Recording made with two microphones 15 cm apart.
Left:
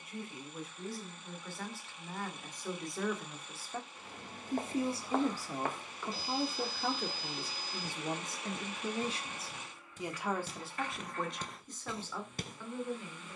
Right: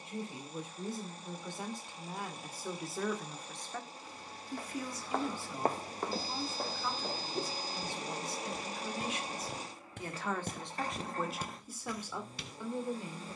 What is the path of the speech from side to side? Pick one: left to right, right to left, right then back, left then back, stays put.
left then back.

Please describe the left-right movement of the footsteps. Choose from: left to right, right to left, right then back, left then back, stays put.
right then back.